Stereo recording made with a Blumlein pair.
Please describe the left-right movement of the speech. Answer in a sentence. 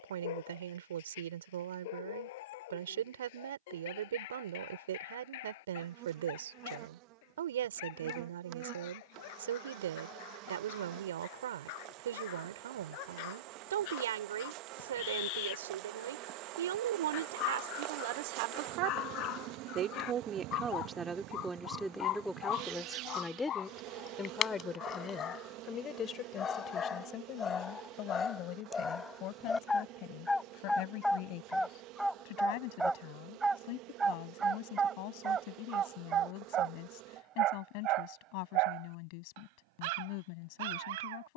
In this clip you hear the speech move to the left.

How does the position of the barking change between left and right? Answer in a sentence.
You can hear the barking travel towards the right.